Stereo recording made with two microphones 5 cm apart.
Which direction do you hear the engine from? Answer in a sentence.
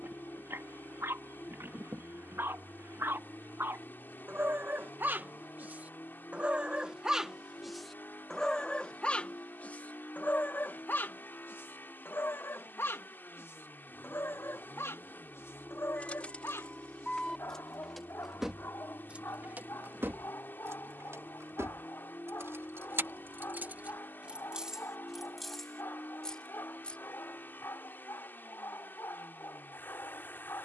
You can hear the engine on the left.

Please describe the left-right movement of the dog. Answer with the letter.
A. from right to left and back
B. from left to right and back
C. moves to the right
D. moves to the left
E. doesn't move
D.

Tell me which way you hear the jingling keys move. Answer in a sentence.
In this clip you hear the jingling keys go right and come back.